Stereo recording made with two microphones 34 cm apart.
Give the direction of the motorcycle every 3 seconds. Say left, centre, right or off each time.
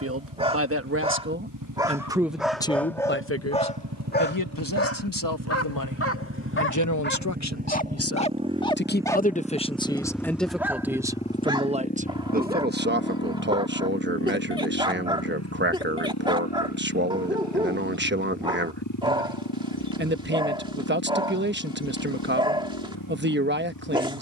right, right, right, centre, left, left, left, left.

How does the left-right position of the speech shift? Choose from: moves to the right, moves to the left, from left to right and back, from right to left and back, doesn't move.
from right to left and back.